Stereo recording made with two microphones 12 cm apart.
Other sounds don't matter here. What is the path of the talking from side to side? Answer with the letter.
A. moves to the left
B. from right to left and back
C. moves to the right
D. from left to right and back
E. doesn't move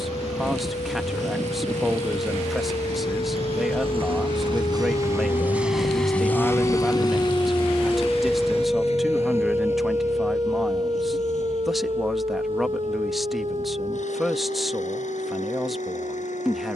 E.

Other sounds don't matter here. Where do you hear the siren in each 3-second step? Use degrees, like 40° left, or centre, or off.
70° left, 60° left, 20° left, 30° right, 50° right, 60° right.